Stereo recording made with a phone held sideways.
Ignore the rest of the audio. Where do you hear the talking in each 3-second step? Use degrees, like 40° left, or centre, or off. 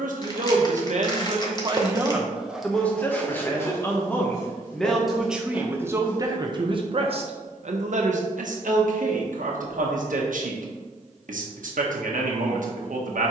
40° right, centre, 50° right, 70° right, 70° right.